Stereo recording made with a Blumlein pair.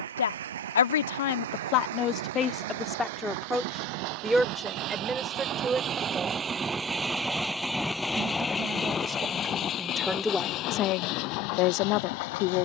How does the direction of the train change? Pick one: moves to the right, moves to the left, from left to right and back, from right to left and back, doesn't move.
moves to the left.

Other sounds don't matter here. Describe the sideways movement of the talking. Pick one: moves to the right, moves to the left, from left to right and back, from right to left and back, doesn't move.
from left to right and back.